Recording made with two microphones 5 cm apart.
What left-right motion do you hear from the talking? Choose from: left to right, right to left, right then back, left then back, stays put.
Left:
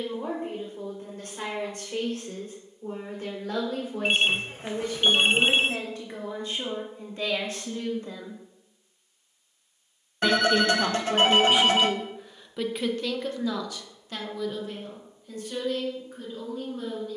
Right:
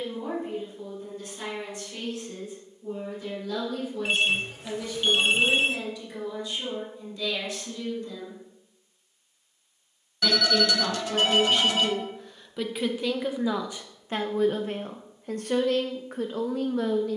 left to right.